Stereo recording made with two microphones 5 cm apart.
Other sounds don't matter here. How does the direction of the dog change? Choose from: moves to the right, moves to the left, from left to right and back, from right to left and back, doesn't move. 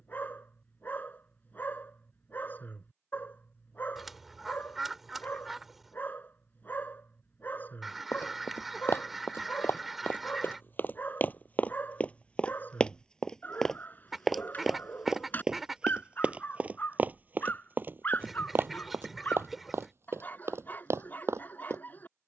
doesn't move.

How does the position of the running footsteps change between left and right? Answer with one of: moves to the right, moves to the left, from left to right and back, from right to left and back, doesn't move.
moves to the right.